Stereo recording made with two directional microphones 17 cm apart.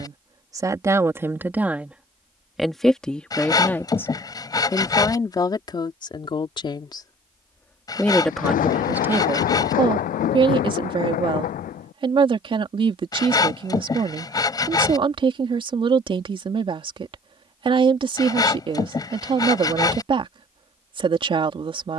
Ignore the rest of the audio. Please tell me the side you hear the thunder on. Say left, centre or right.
left.